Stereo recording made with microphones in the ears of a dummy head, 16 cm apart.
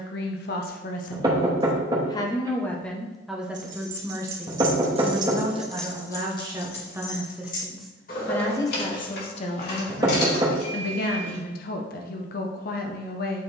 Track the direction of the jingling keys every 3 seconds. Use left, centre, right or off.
off, right, left, left, off.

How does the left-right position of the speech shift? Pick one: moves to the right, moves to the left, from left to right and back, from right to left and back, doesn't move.
from left to right and back.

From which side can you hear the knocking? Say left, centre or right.
right.